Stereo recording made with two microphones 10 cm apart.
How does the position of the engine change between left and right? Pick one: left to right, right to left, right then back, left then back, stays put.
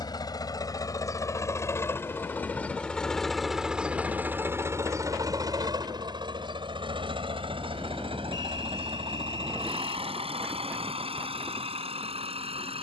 left to right.